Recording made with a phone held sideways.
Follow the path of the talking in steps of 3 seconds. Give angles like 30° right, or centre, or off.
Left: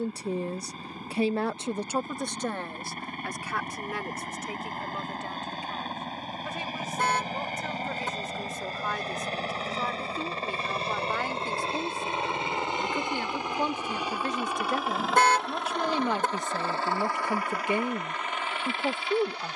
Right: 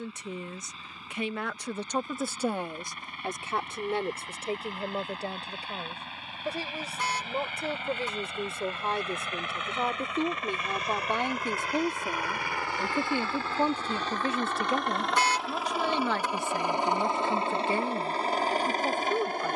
10° left, 30° right, 30° right, 30° right, 10° right, 10° left, 20° left.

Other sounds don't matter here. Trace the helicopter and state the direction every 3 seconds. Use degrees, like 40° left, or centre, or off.
50° left, 50° left, 40° left, 30° left, 20° left, 10° right, 40° right.